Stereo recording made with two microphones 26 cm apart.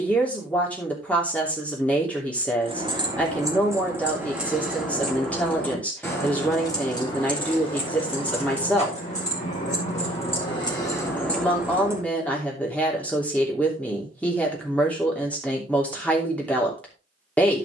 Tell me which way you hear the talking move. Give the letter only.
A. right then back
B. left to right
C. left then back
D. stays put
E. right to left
D.